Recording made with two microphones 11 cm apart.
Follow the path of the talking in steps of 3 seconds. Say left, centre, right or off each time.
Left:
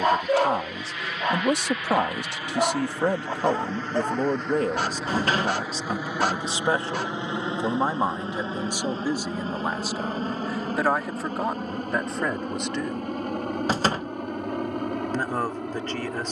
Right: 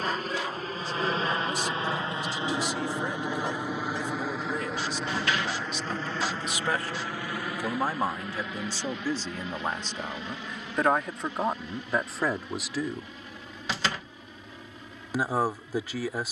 left, left, left, centre, centre, centre.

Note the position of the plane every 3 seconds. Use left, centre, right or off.
right, centre, left, left, left, left.